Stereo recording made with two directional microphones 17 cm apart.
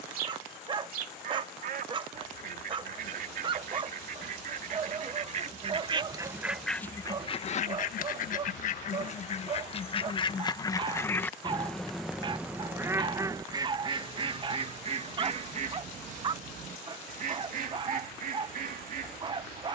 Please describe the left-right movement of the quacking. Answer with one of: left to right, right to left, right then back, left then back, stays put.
left then back.